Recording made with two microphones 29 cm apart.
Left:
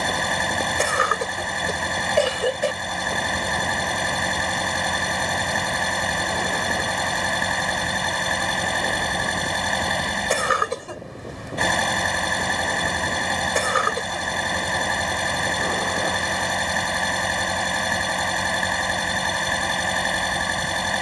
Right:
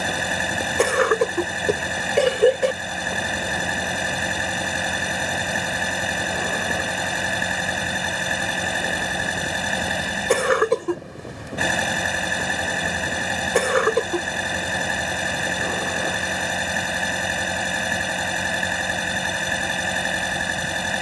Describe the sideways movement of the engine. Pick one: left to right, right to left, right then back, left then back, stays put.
stays put.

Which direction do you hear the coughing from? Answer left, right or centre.
right.